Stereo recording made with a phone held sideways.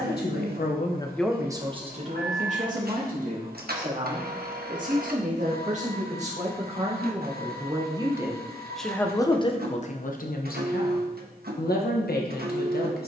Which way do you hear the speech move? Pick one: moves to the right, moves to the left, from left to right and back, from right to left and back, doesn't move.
from left to right and back.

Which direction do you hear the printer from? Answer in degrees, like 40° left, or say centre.
70° right.